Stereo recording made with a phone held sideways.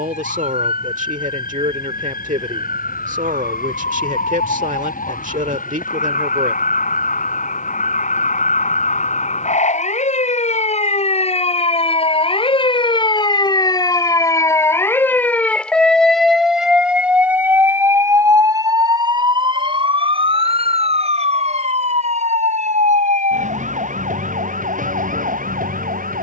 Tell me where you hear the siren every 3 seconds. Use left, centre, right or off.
left, left, left, left, left, centre, right, right, right.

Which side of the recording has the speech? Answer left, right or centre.
right.